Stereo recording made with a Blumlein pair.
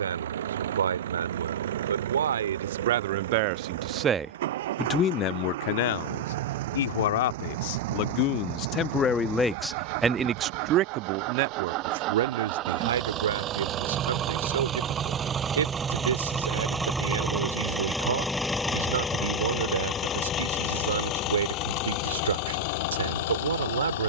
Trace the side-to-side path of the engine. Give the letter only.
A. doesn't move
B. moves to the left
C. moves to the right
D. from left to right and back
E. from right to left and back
B.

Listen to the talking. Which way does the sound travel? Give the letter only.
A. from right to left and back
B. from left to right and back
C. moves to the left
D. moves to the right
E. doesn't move
A.